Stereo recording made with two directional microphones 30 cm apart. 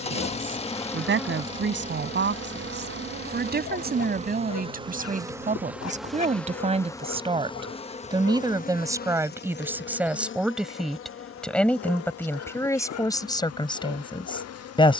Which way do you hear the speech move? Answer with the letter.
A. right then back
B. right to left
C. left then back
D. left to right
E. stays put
B.